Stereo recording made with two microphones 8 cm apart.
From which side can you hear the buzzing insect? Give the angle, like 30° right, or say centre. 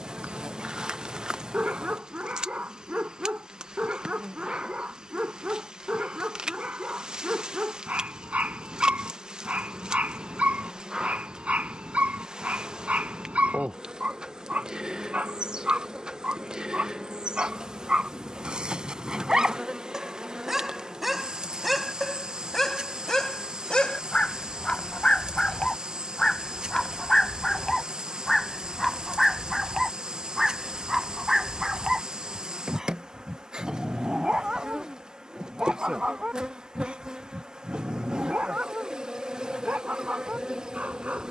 10° right.